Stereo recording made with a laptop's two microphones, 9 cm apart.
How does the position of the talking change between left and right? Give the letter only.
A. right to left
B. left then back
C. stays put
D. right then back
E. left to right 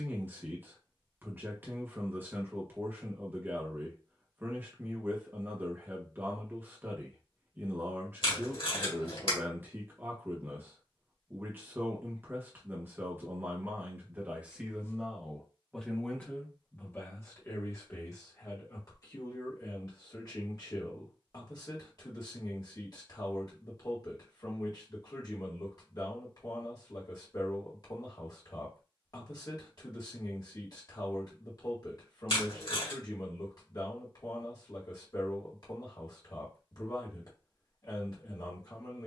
A.